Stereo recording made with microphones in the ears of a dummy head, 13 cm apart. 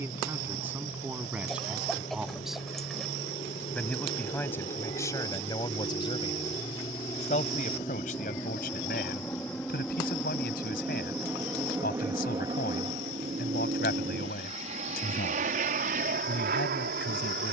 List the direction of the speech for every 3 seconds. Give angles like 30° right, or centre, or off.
10° right, 20° left, 50° left, 70° left, 70° left, 70° left.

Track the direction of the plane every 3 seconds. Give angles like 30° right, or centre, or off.
50° left, 40° left, 20° left, centre, 30° right, 50° right.